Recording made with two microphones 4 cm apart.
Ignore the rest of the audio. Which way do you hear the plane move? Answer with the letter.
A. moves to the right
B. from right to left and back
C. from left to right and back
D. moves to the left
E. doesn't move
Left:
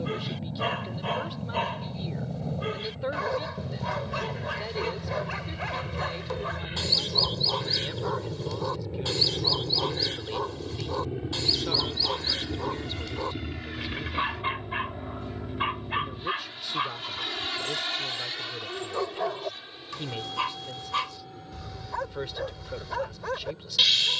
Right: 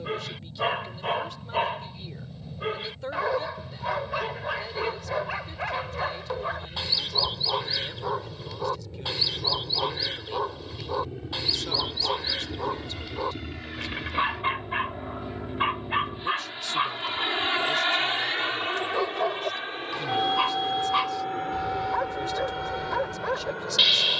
A.